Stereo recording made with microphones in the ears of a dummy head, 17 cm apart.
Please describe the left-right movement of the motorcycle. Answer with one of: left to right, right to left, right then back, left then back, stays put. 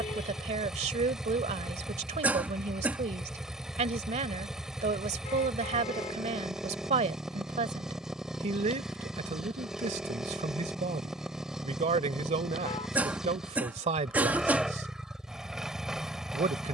stays put.